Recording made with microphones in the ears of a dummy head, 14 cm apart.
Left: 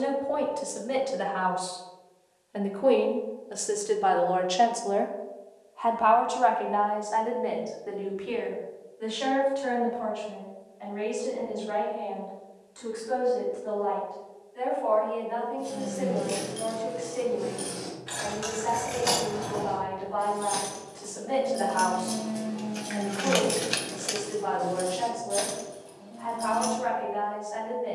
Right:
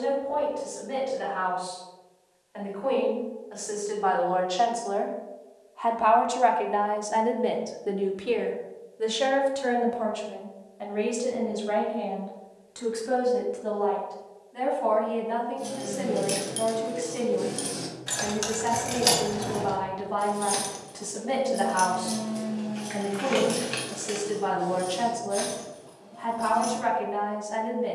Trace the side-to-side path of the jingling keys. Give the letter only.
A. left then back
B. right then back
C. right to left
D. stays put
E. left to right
C.